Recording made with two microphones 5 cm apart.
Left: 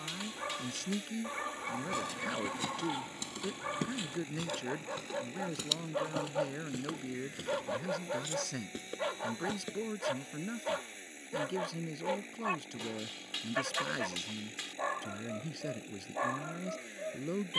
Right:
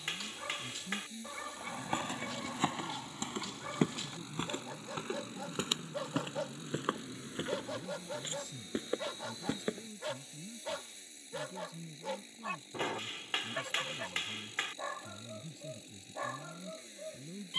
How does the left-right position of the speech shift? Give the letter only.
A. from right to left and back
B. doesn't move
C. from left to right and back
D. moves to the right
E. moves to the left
B.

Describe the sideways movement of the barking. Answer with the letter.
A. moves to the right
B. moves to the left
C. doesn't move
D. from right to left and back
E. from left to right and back
C.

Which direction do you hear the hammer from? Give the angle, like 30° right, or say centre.
50° right.